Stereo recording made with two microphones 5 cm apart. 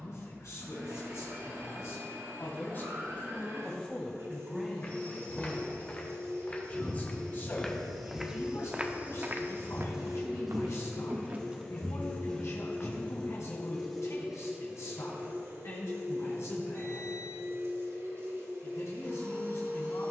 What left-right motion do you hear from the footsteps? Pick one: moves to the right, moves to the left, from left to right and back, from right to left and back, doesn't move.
from left to right and back.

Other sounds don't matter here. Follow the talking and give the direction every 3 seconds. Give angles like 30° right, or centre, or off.
60° left, 10° left, 50° left, 70° left, 70° left, 70° left, 70° left.